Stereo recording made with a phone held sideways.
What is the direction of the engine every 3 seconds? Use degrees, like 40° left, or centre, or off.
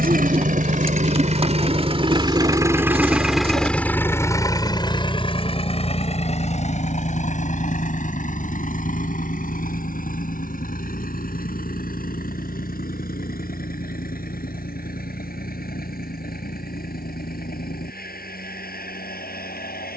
40° right, 20° left, 50° left, 60° left, 70° left, 70° left, 70° left.